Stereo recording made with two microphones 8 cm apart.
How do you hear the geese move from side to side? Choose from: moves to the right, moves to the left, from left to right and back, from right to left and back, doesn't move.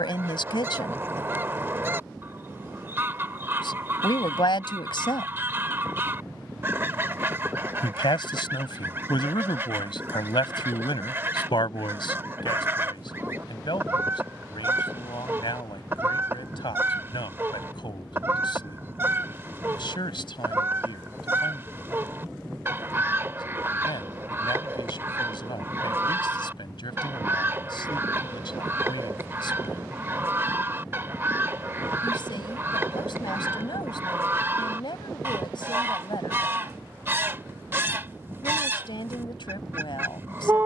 doesn't move.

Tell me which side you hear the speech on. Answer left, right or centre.
left.